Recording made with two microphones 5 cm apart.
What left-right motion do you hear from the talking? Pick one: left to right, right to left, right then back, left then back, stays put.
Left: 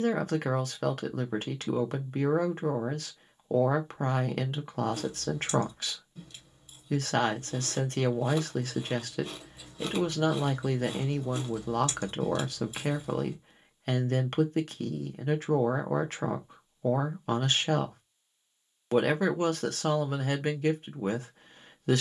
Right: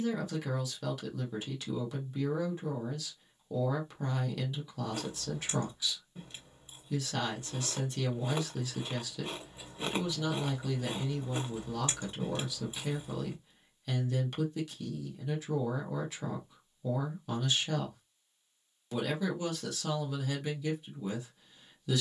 stays put.